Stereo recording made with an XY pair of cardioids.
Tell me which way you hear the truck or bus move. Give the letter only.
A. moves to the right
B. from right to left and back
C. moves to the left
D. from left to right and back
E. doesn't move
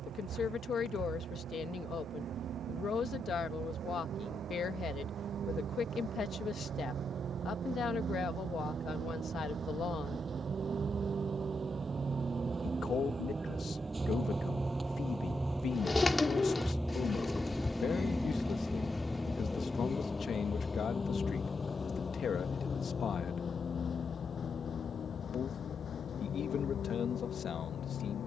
C.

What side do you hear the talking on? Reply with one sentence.
You can hear the talking on the left.